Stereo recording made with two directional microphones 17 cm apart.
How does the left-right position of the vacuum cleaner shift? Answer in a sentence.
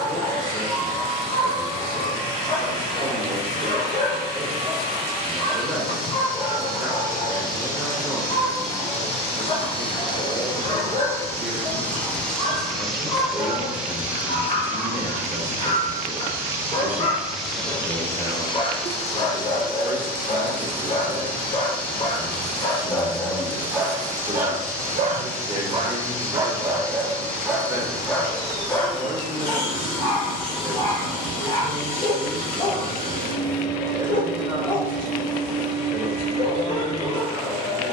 You can hear the vacuum cleaner go right and come back.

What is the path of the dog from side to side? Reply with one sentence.
You can hear the dog go right and come back.